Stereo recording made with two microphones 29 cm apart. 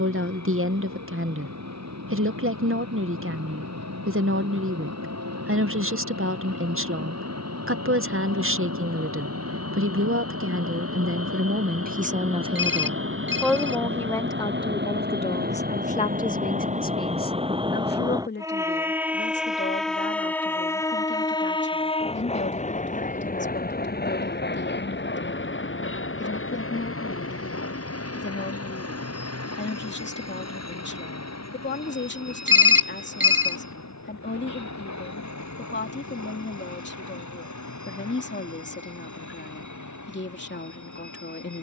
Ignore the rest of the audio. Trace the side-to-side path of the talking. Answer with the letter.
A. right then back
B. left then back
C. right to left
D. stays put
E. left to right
C.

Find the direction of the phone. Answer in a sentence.
In this clip you hear the phone on the right.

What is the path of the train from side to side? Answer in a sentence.
You can hear the train go from the right side to the left.